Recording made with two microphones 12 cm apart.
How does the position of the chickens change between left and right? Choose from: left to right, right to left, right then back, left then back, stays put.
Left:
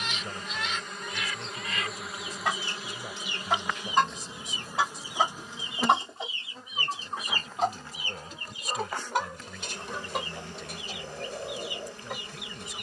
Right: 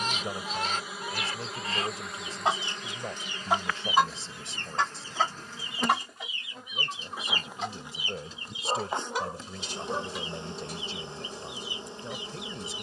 right to left.